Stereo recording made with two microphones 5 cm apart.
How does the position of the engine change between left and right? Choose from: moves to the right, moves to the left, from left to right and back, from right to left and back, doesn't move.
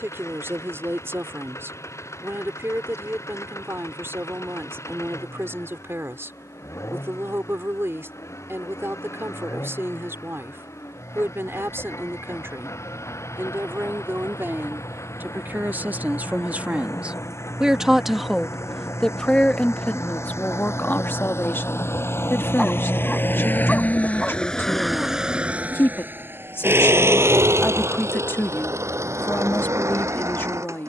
moves to the right.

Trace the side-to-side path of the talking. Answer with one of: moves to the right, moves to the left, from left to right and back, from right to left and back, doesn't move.
moves to the left.